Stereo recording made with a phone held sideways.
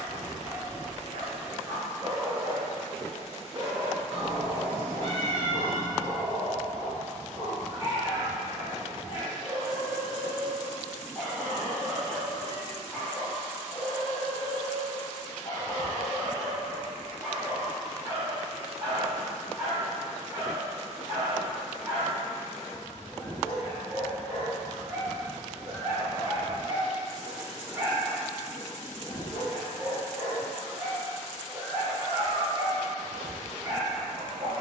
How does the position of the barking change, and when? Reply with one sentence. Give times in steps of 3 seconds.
You can hear the barking on the right from 0 s, in the centre from 9 s, on the left from 12 s, in the centre from 15 s and on the right from 18 s.